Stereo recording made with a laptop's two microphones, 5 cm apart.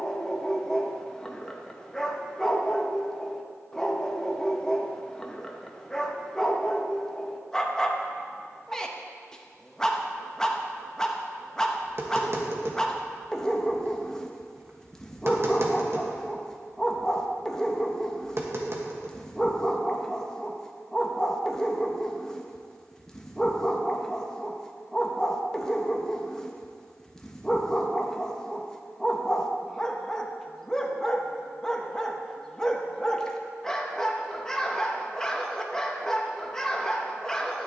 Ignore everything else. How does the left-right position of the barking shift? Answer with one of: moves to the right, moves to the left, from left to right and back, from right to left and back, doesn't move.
doesn't move.